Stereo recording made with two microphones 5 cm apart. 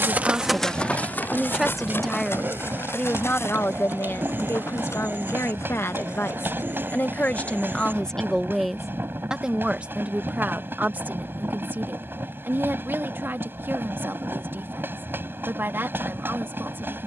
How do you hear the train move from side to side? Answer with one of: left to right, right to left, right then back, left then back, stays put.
stays put.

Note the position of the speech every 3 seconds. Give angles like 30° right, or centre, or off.
10° right, 60° left, 30° left, 30° right, 50° right, 50° right.